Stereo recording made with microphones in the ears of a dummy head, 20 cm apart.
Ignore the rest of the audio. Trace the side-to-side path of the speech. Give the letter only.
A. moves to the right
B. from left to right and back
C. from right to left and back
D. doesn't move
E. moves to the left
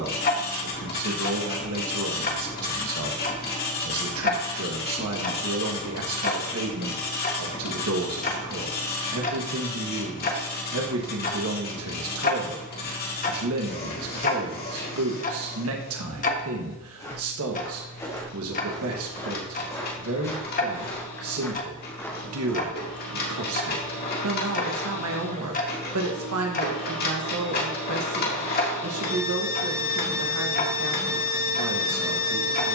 D.